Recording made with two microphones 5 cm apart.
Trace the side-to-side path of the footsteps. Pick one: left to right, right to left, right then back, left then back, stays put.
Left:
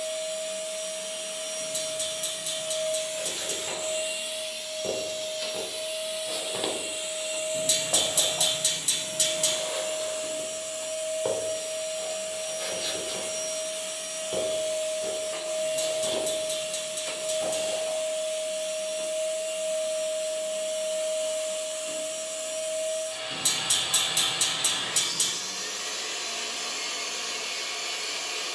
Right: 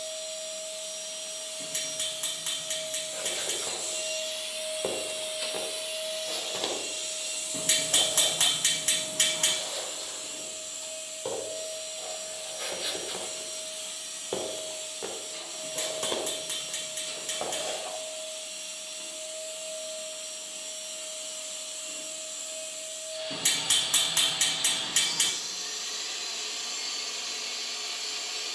left then back.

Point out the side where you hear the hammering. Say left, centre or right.
right.